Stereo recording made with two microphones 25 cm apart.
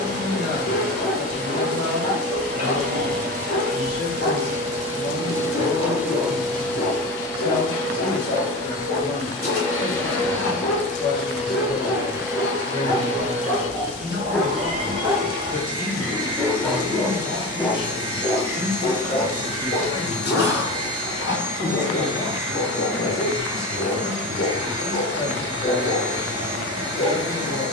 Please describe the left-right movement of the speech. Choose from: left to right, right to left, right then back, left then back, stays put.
stays put.